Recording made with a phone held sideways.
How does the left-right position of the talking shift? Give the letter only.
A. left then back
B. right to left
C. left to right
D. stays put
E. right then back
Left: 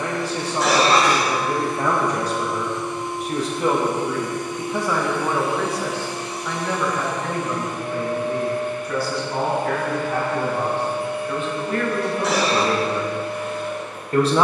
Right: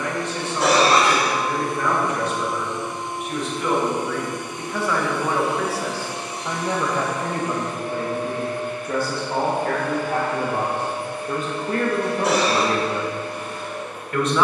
E.